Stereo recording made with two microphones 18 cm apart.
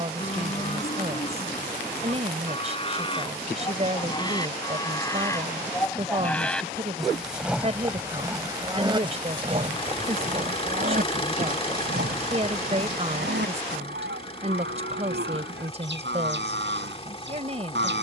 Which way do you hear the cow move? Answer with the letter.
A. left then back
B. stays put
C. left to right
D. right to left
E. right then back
C.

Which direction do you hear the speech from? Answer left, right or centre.
right.